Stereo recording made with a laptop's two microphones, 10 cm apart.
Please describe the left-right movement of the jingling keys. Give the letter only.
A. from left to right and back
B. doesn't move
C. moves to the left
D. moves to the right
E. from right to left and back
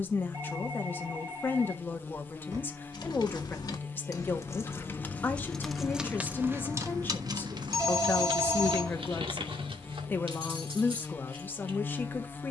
D.